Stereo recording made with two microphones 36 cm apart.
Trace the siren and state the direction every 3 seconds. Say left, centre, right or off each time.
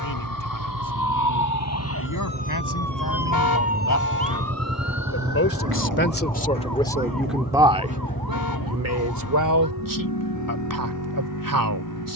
left, right, right, right.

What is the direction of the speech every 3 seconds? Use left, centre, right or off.
left, left, centre, right.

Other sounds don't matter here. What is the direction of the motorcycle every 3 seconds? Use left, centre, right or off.
right, right, left, left.